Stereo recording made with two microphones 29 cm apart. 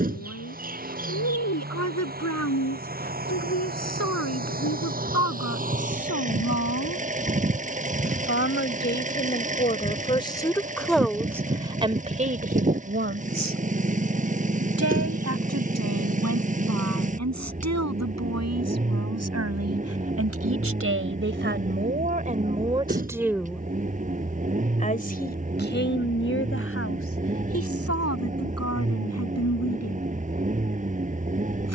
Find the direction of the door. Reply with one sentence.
In this clip you hear the door on the right.